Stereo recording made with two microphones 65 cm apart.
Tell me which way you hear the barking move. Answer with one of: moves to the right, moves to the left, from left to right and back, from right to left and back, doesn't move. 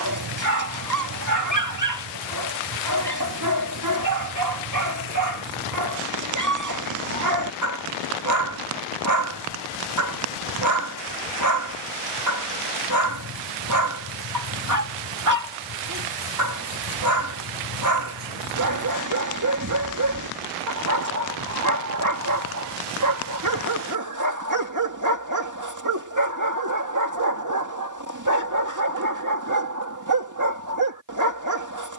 doesn't move.